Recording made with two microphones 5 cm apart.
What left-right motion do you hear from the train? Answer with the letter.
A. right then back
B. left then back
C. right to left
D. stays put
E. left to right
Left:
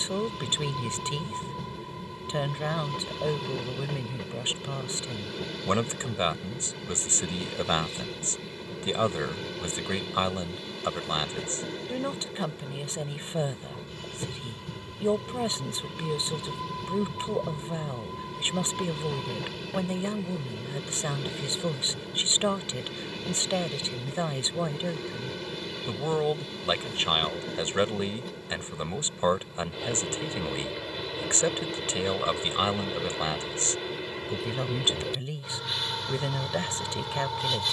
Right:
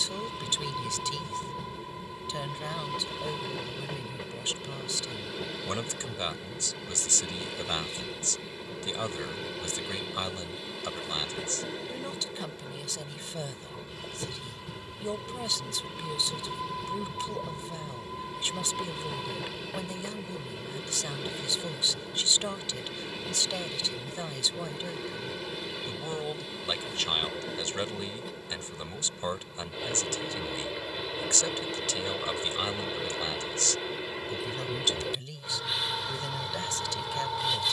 D.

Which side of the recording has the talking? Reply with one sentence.
You can hear the talking on the left.